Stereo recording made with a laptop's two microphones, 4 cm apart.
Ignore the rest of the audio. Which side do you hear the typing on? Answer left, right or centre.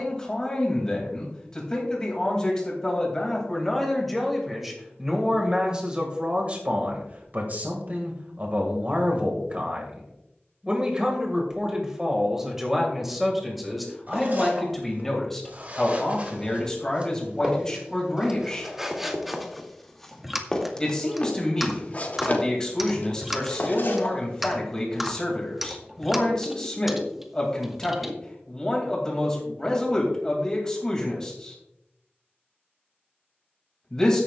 centre.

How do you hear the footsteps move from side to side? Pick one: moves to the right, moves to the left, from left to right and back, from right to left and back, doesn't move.
moves to the left.